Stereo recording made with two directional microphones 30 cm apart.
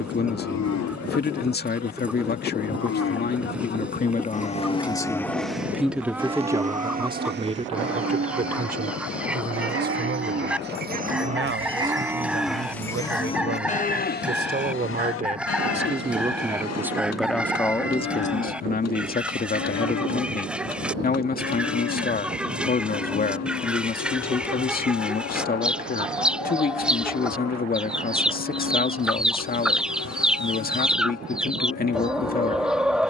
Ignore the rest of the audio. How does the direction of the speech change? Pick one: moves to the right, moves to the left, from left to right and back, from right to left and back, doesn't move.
from left to right and back.